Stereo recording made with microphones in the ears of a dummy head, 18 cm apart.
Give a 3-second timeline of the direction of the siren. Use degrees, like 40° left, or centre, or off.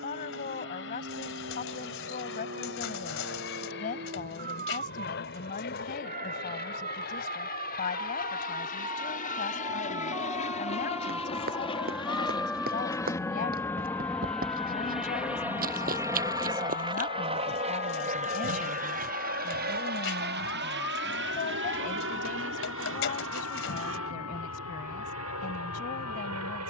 50° right, 40° right, 30° right, 10° right, 10° left, 40° left, 50° left, 70° left, 70° left.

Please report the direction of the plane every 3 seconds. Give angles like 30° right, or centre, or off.
60° left, 50° left, 50° left, 30° left, 10° left, 20° right, 40° right, 60° right, 70° right.